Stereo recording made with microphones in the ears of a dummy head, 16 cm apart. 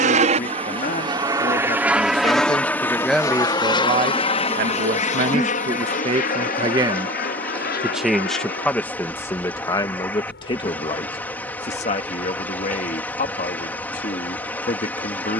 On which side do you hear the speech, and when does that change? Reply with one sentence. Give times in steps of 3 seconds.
You can hear the speech on the left from 0 s, on the right from 3 s, in the centre from 6 s and on the left from 9 s.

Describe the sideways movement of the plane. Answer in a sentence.
In this clip you hear the plane move from right to left.